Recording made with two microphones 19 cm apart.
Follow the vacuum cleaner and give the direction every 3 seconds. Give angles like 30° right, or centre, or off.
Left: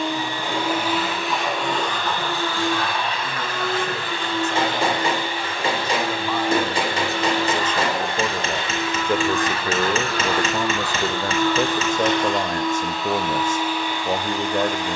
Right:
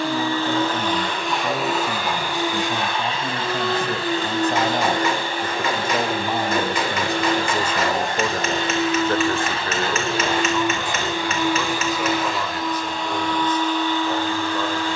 centre, 40° right, 50° right, 20° right, 10° left.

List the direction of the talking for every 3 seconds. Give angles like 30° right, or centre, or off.
50° right, 40° right, 10° right, 30° left, 50° left.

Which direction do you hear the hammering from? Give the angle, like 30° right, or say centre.
30° left.